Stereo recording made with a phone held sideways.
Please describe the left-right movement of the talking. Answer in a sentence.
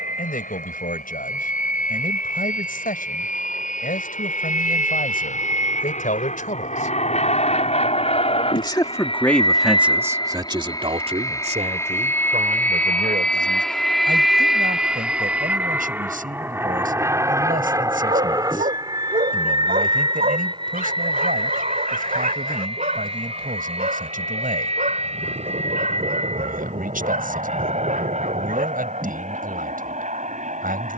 You can hear the talking move from left to right.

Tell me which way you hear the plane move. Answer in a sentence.
You can hear the plane move from left to right.